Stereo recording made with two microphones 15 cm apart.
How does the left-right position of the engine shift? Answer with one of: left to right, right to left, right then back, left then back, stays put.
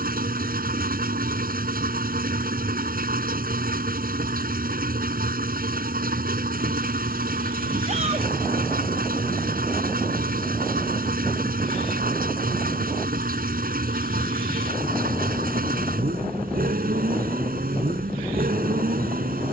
stays put.